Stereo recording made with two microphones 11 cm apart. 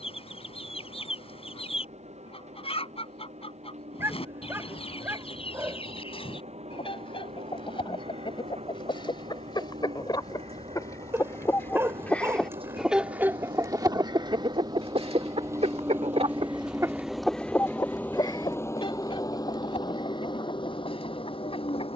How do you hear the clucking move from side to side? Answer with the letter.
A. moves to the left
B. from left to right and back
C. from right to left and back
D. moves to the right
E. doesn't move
B.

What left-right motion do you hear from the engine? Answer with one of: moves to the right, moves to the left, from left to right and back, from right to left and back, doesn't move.
moves to the left.